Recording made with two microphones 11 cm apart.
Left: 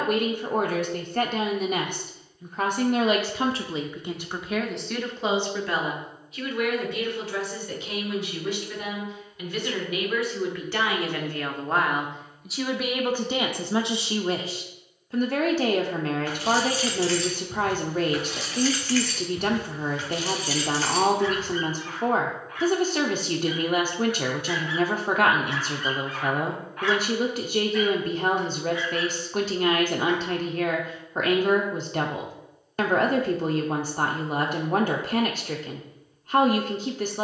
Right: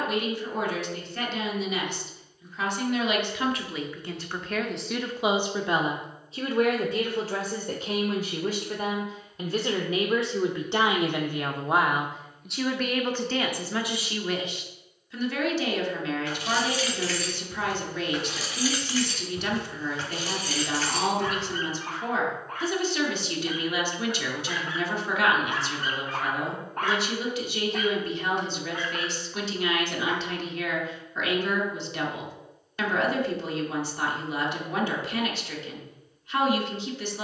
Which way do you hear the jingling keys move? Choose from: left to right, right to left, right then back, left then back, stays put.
left to right.